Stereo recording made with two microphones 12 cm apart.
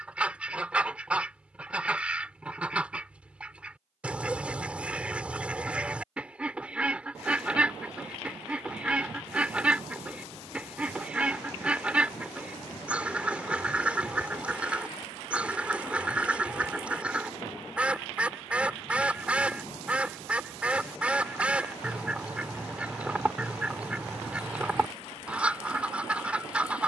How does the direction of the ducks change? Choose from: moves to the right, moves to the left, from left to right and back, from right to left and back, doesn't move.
doesn't move.